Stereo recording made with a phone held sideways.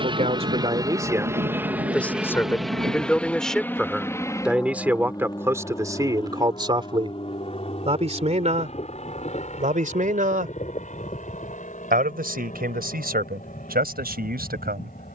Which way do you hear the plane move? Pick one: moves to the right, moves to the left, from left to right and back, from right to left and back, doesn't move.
moves to the left.